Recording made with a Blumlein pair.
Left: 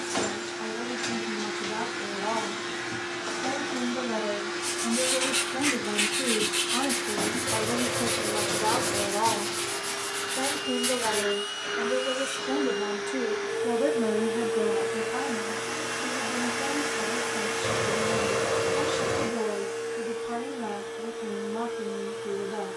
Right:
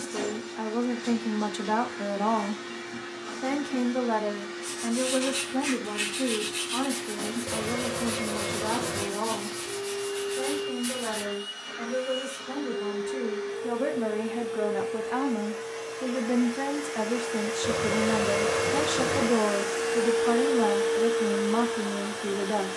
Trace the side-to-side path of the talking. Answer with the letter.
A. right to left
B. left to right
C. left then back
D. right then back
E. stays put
C.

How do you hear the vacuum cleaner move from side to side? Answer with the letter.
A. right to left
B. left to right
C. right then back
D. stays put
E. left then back
B.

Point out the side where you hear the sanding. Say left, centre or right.
left.